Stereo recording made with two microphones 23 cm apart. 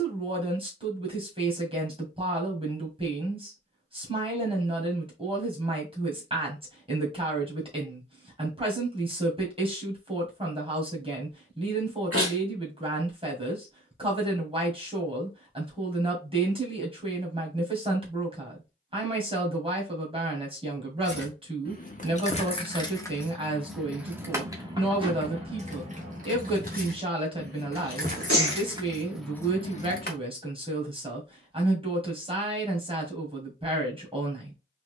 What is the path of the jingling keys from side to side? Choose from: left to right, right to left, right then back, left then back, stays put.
right then back.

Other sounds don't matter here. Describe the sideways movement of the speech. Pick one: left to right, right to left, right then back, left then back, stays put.
stays put.